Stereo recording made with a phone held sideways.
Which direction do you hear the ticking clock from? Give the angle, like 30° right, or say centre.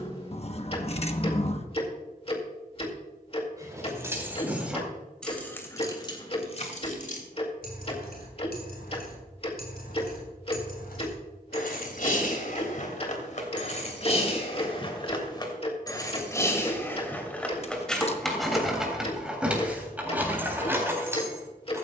40° left.